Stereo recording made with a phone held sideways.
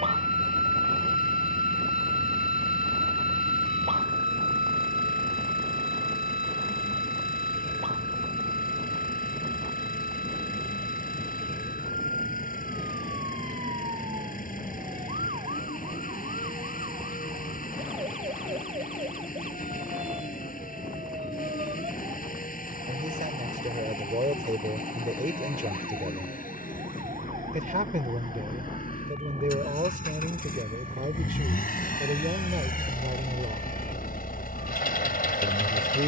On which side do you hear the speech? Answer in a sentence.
In this clip you hear the speech on the right.